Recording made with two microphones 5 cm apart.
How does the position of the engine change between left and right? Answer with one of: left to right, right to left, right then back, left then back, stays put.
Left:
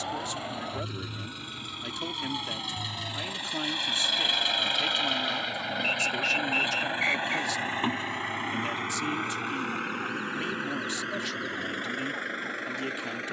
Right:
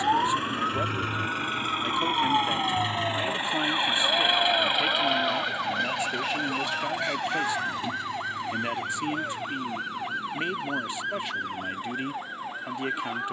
right to left.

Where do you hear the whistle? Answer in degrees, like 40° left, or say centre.
50° left.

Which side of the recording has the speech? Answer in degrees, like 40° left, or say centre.
20° right.